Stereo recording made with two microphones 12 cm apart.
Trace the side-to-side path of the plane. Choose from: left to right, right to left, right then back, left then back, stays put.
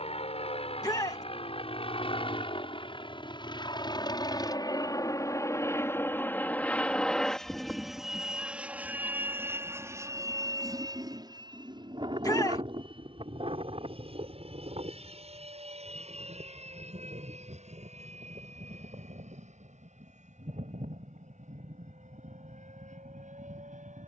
left to right.